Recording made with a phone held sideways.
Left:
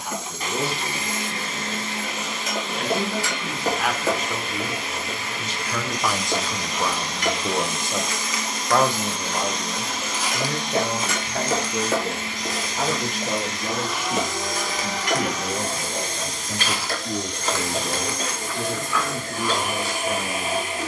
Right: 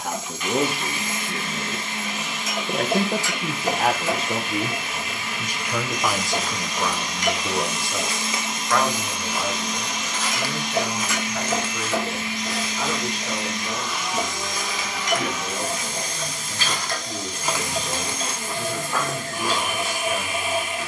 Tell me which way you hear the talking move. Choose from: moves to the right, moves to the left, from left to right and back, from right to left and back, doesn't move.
moves to the left.